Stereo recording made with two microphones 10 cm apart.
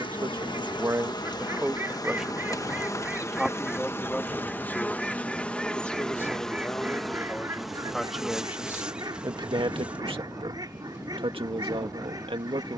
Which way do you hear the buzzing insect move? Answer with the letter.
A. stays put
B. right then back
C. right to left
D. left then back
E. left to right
E.